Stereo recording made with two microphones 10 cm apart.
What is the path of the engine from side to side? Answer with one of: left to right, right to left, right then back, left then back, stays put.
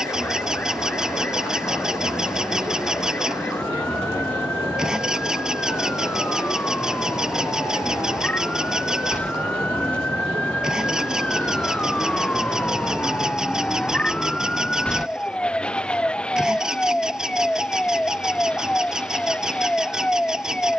stays put.